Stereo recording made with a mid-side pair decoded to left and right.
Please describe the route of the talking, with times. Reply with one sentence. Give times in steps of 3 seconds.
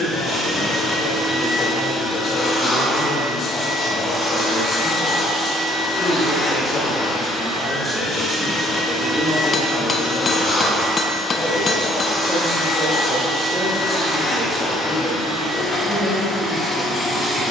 In this clip you hear the talking on the left from 0 s and in the centre from 9 s.